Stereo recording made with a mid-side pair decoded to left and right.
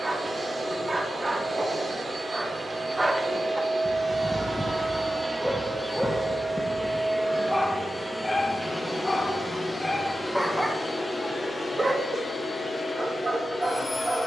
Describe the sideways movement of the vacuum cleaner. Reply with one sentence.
You can hear the vacuum cleaner travel towards the left.